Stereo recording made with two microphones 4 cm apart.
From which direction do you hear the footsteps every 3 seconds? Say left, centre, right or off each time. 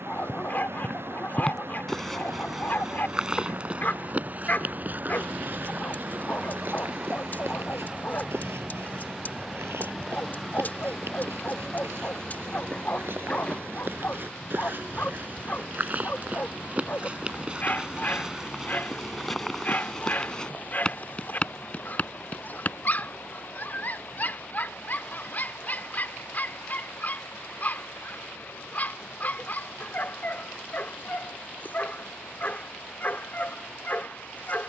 centre, right, right, right, right, right, centre, left, off, off, off, off.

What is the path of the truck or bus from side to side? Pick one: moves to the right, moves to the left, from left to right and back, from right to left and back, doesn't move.
moves to the left.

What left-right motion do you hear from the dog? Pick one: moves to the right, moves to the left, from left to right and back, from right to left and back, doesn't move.
doesn't move.